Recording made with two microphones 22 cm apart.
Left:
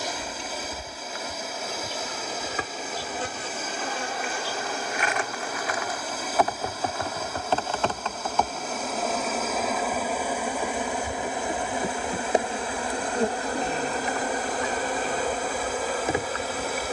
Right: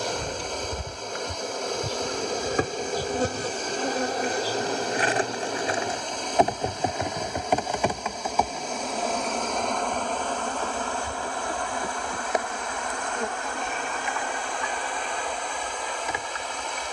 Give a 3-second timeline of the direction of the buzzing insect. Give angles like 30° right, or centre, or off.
50° right, 40° right, 10° right, 10° left, 40° left, 50° left.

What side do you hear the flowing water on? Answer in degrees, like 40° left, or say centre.
10° left.